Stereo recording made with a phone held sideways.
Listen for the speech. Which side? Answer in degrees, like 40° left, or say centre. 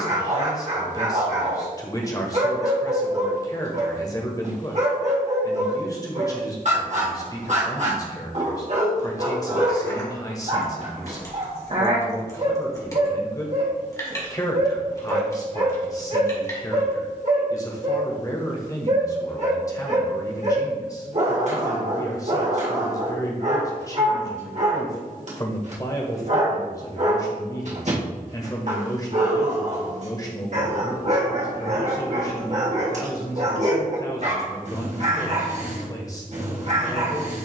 20° left.